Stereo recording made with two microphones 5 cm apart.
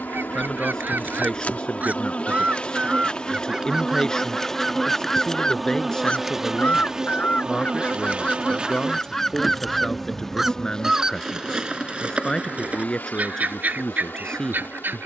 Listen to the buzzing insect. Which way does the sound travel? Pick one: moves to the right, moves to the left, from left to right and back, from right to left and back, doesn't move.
from left to right and back.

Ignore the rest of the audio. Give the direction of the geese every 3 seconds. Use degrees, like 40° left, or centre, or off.
30° right, centre, 20° left, 10° right, 30° right.